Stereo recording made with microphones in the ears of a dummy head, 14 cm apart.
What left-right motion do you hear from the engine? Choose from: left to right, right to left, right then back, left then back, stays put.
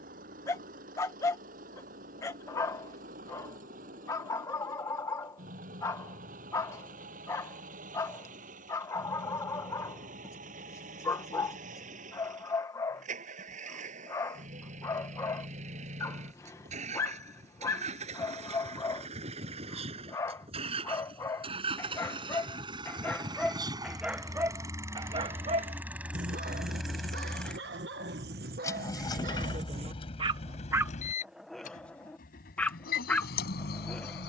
right to left.